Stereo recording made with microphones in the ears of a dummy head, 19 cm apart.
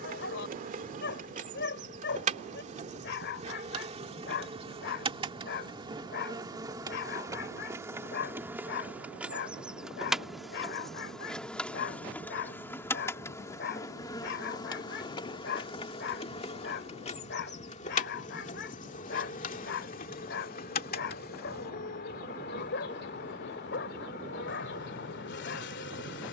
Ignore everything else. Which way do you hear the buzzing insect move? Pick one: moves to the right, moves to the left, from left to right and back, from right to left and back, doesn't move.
moves to the left.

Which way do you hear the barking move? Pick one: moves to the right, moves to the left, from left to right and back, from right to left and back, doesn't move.
doesn't move.